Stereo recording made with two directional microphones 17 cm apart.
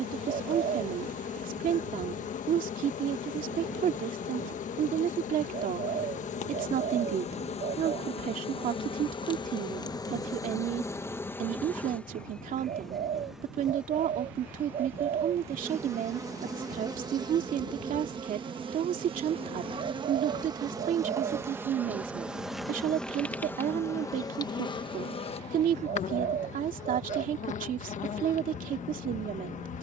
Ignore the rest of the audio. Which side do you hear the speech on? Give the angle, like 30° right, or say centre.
50° right.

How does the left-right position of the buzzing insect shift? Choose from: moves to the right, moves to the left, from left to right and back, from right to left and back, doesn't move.
from left to right and back.